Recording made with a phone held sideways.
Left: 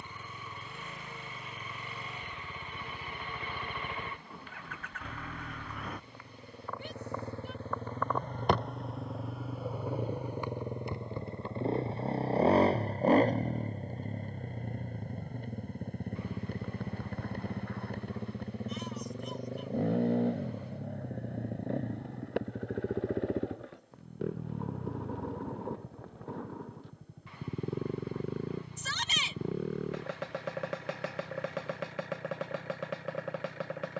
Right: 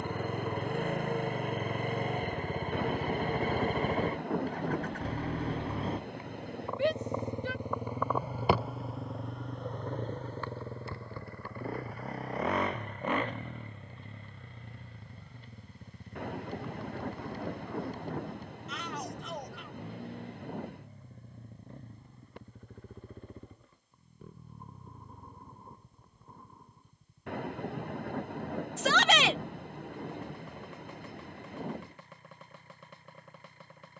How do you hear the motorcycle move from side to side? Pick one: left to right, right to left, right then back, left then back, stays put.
right to left.